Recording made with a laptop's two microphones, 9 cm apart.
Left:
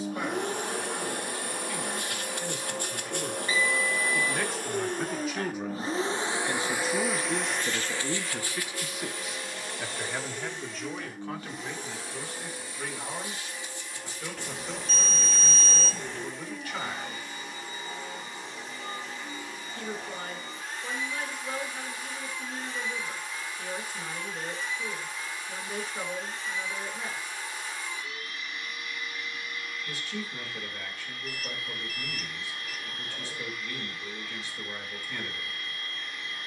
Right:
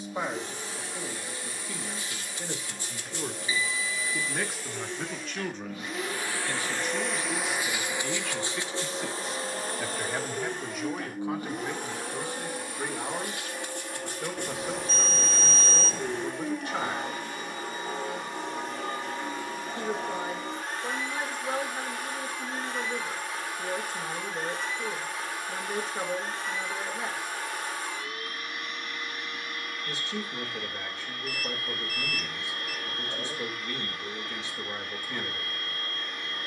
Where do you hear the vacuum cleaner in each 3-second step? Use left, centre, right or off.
left, left, centre, right, right, right, right, right, right, right, right, right.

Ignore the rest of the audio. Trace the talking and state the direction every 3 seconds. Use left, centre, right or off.
right, centre, left, centre, right, right, right, right, right, right, right, right.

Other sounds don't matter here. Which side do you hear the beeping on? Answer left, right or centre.
centre.